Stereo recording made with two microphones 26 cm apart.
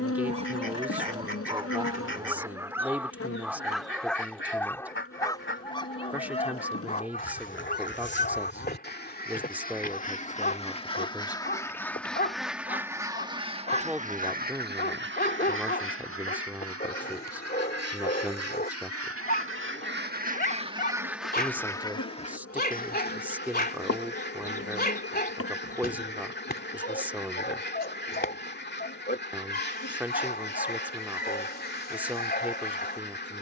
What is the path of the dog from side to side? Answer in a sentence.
In this clip you hear the dog travel towards the left.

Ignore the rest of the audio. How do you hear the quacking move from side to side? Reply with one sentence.
In this clip you hear the quacking go right and come back.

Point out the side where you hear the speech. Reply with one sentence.
In this clip you hear the speech in the centre.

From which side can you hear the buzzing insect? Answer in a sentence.
In this clip you hear the buzzing insect on the left.